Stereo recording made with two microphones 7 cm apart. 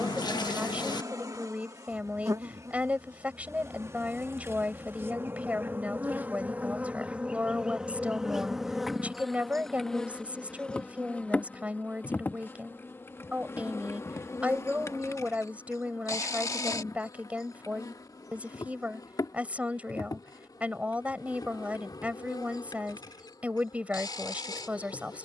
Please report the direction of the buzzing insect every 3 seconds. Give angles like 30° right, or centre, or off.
50° right, 40° right, 10° right, 10° left, 30° left, 50° left, 60° left, 70° left, 70° left.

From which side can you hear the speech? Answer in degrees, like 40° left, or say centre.
20° right.